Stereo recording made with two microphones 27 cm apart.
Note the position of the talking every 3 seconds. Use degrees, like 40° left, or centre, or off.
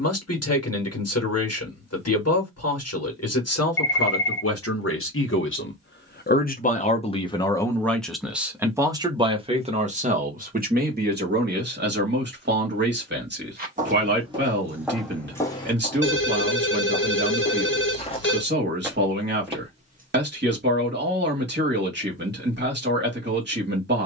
70° left, 60° left, 10° left, 30° right, 40° right, 40° right, 40° right, 40° right.